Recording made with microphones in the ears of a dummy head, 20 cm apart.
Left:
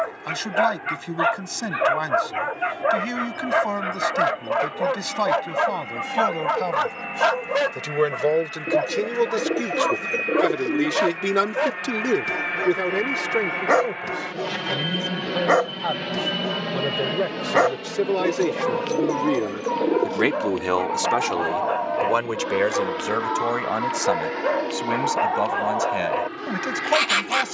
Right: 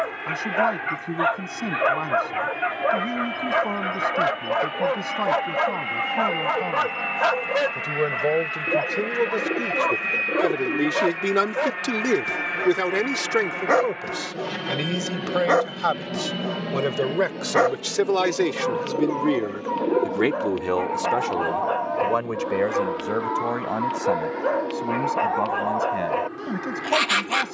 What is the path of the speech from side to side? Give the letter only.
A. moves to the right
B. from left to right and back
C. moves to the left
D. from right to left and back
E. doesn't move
B.